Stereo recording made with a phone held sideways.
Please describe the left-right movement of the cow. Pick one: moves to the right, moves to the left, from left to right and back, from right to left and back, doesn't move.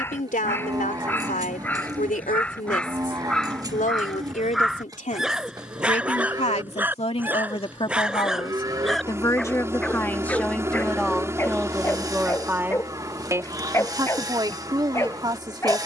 doesn't move.